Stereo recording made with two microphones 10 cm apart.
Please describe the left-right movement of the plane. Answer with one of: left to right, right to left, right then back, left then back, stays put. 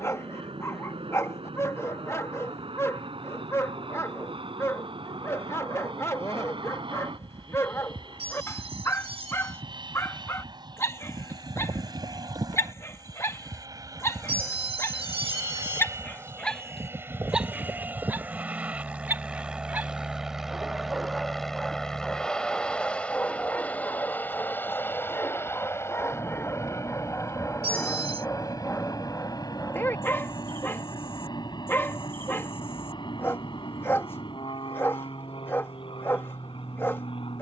right to left.